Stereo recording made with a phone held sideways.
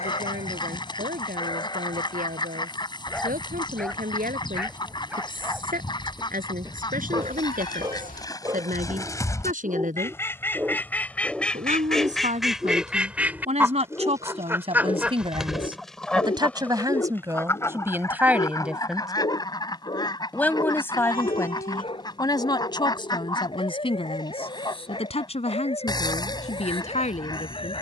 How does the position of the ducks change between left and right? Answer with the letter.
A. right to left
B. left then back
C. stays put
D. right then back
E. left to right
D.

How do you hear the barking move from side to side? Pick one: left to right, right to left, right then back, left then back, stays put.
right then back.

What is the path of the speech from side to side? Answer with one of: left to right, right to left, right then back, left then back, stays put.
right to left.